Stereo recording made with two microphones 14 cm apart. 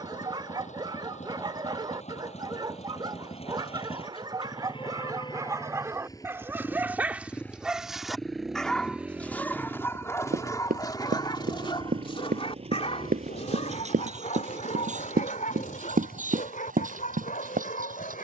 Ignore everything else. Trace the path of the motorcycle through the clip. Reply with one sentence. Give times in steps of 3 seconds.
In this clip you hear the motorcycle on the left from 0 s, in the centre from 6 s and on the right from 9 s.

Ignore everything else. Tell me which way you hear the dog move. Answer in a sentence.
In this clip you hear the dog go from the right side to the left.